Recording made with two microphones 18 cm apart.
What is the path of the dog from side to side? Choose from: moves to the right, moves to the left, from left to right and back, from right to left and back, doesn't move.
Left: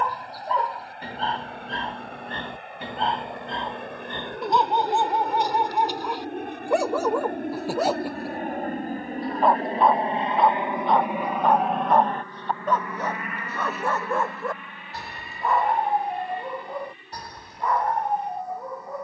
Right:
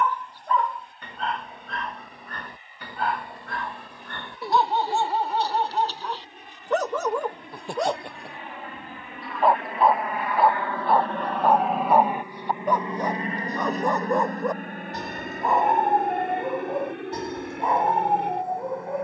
moves to the right.